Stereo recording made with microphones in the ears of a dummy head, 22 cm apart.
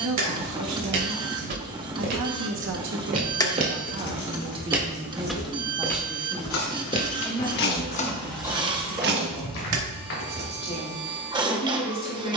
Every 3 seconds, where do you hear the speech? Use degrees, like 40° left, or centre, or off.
70° right, 20° right, 10° left, 20° left.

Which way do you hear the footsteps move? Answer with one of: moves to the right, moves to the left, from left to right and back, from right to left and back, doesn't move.
moves to the left.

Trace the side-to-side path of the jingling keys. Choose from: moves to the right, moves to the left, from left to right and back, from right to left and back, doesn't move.
from right to left and back.